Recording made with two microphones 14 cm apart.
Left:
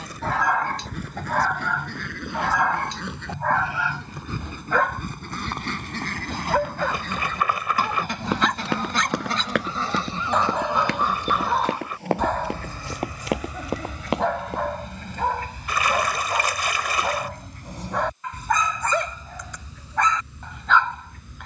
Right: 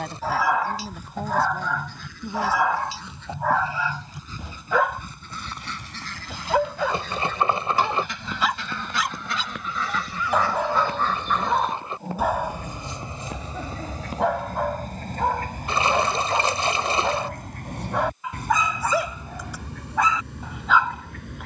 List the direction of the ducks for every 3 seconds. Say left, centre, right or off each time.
left, left, left, left, right, right, right.